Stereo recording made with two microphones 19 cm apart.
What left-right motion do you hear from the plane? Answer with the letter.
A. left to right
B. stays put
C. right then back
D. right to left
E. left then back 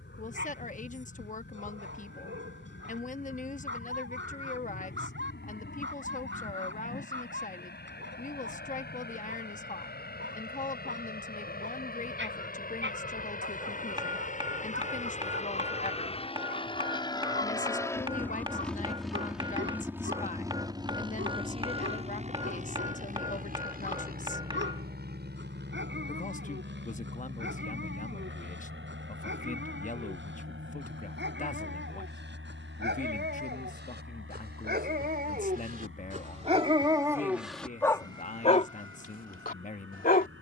A.